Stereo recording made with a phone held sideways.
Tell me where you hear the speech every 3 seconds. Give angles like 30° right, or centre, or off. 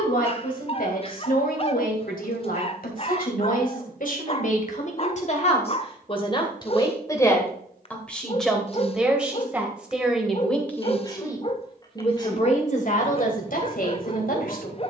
60° left, 50° left, 10° left, 10° left, 50° left.